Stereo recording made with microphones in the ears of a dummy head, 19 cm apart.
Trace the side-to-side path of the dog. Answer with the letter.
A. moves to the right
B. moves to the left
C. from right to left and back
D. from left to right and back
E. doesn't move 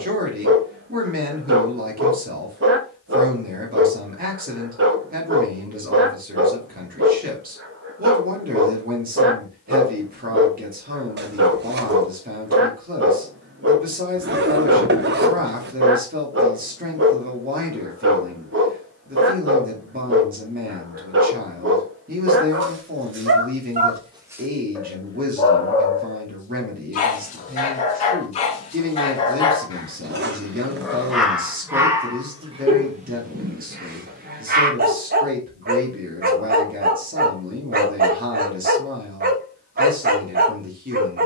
C.